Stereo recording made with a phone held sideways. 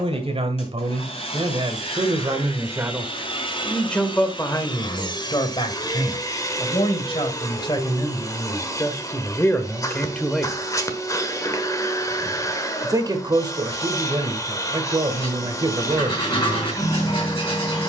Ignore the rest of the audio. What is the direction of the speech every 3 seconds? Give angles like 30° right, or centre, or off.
40° right, 20° left, 30° left, 10° left, 30° right, 40° right.